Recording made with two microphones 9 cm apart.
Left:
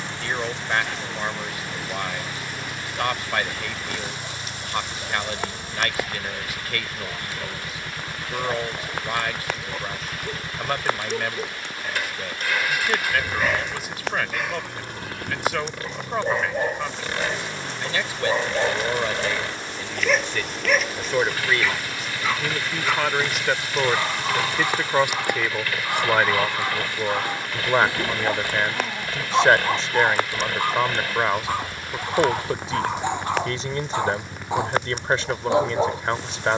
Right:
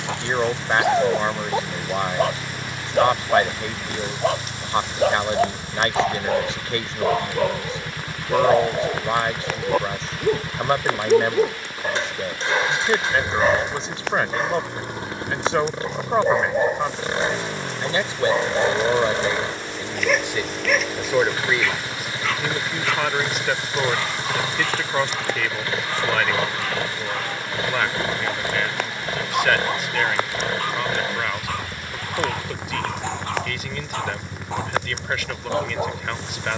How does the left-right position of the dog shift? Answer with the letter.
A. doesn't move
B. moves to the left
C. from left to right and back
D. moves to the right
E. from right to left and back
B.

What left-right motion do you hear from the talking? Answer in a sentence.
In this clip you hear the talking go from the right side to the left.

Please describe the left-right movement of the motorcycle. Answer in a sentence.
In this clip you hear the motorcycle stay in one place.